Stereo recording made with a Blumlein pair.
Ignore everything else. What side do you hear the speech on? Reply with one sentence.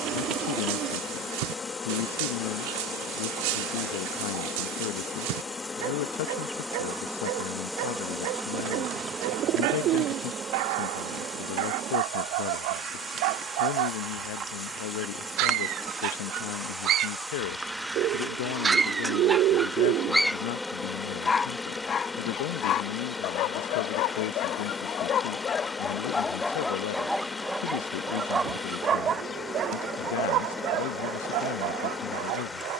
In this clip you hear the speech on the left.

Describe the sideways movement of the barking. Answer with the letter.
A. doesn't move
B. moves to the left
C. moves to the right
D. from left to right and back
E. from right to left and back
E.